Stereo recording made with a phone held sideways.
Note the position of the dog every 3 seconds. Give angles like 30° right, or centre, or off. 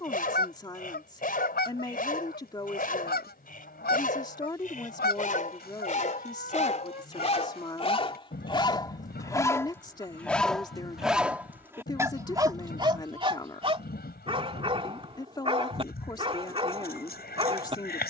60° left, 60° left, 40° left, centre, 30° right, 30° right.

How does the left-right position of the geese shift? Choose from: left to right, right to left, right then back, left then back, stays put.
stays put.